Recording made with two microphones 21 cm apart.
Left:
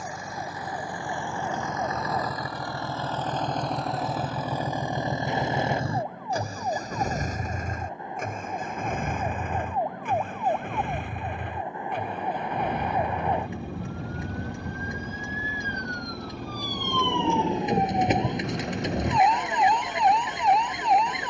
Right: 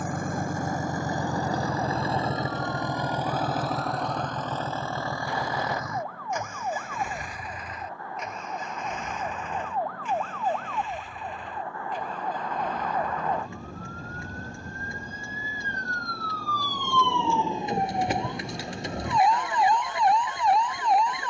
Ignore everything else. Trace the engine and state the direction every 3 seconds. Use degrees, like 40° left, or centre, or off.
40° right, 10° left, 40° left, 60° left, 70° left, 70° left, 70° left.